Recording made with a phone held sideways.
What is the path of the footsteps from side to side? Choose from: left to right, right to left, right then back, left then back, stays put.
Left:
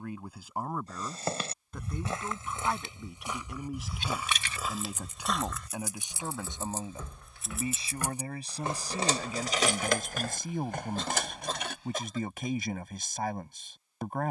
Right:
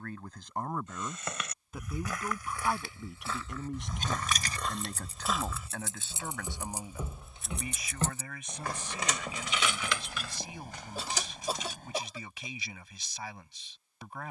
left to right.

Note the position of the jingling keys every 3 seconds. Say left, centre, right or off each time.
off, right, centre, left, off.